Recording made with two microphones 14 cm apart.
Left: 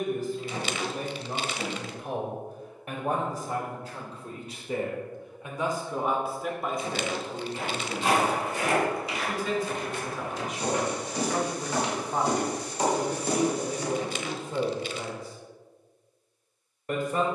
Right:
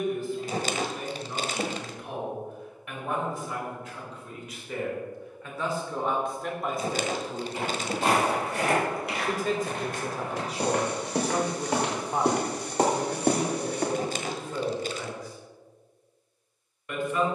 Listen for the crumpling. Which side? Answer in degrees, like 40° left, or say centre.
40° right.